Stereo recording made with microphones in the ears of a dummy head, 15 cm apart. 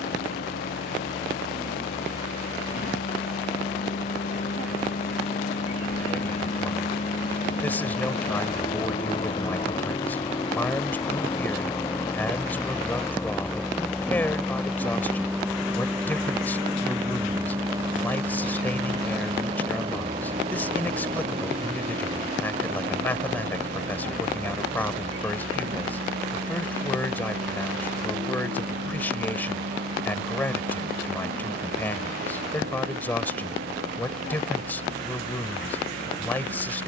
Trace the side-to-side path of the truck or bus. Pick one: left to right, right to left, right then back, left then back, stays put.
left to right.